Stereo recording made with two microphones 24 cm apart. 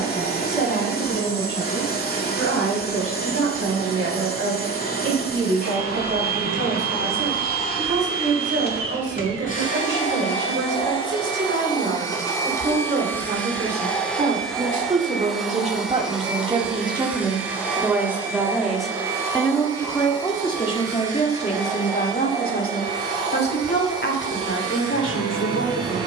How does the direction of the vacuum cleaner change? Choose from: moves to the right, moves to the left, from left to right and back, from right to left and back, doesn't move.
moves to the right.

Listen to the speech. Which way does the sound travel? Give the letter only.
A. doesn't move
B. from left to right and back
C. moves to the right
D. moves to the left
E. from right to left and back
D.